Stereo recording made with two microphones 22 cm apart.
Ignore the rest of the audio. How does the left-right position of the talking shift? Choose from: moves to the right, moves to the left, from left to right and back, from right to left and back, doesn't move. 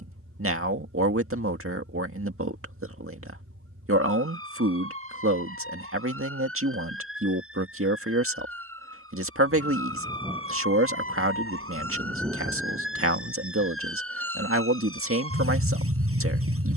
doesn't move.